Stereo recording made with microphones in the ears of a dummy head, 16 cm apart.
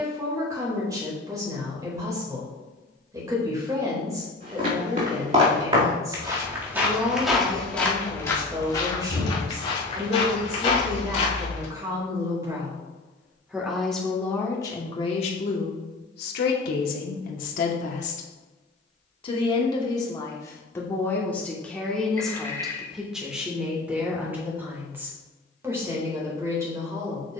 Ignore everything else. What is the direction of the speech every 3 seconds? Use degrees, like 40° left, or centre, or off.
20° right, 20° right, 20° right, 20° right, centre, 50° left, 30° left, centre, 20° right.